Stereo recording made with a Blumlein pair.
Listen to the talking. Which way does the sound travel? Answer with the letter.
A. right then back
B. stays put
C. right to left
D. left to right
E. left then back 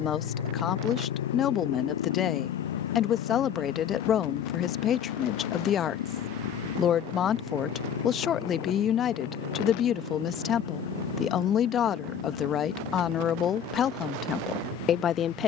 B.